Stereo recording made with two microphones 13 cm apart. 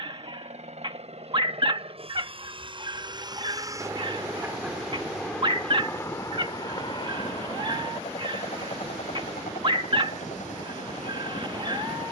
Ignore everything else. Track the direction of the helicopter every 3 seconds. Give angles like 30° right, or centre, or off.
50° right, 10° right, 40° left, 60° left.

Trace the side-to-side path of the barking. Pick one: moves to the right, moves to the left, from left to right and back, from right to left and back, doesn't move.
doesn't move.